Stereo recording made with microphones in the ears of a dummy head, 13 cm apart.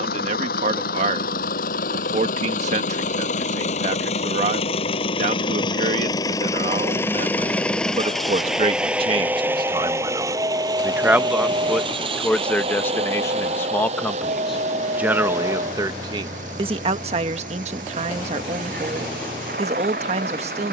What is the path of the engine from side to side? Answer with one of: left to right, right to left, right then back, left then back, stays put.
left to right.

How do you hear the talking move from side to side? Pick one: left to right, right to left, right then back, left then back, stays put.
left then back.